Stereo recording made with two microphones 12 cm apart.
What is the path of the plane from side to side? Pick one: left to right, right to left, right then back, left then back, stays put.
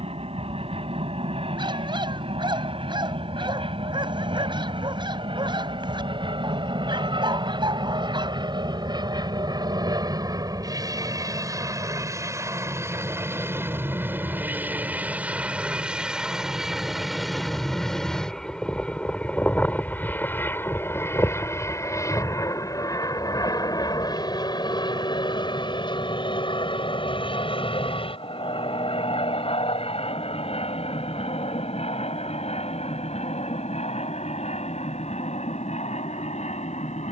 right to left.